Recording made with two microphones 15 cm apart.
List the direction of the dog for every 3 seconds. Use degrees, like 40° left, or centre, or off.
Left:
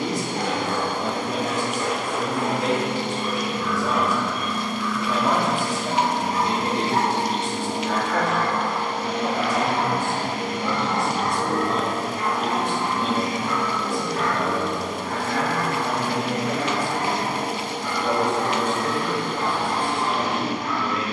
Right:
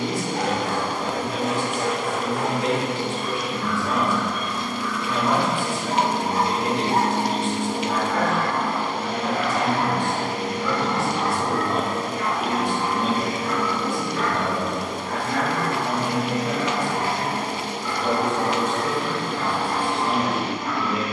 60° right, 50° right, 20° right, 30° left, 60° left, 70° left, 70° left.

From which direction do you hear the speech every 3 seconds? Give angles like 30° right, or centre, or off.
40° left, 40° left, 40° left, centre, 20° right, 20° right, 20° right.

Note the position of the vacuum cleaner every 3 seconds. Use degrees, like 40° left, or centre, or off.
30° left, 20° left, 40° right, 40° right, 10° right, 20° left, 20° left.